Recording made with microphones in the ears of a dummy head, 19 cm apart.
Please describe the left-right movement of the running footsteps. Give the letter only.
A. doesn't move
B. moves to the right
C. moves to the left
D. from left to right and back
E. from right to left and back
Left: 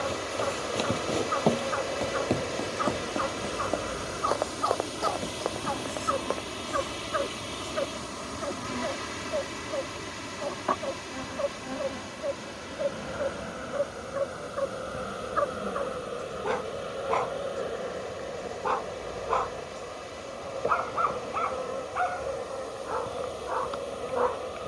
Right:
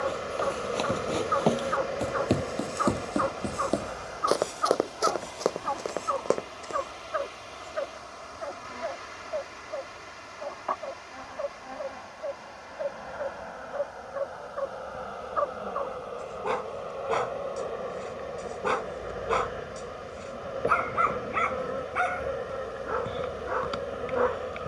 B.